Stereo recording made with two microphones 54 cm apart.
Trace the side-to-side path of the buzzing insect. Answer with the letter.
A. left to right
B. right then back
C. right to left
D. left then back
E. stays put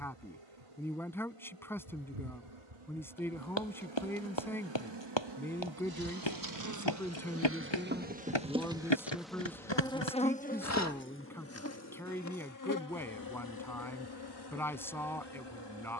C.